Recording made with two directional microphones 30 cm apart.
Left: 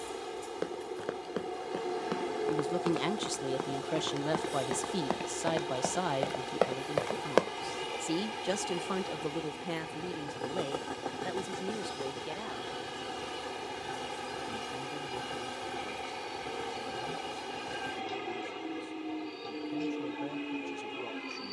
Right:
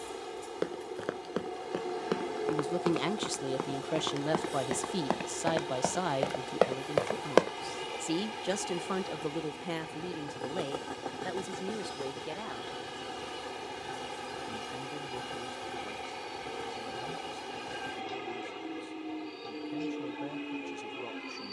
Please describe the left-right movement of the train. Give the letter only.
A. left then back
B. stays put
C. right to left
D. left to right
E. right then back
B.